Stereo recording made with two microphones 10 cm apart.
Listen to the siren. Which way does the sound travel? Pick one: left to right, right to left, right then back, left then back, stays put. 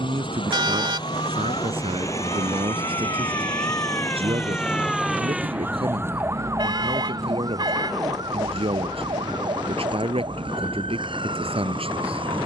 left to right.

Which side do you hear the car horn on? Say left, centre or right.
right.